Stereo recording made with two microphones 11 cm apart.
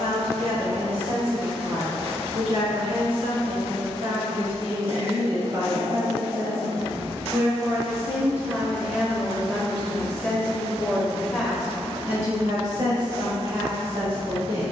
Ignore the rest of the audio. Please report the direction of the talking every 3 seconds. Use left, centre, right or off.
right, right, right, centre, right.